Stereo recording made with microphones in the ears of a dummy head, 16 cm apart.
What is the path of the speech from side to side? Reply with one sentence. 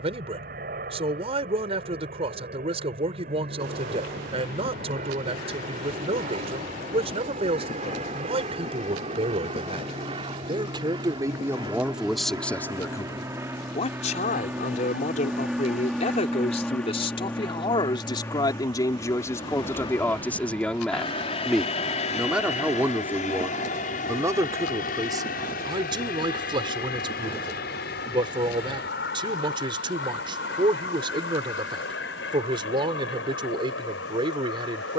You can hear the speech move from right to left and back again.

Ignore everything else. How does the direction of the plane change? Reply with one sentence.
In this clip you hear the plane go from the right side to the left.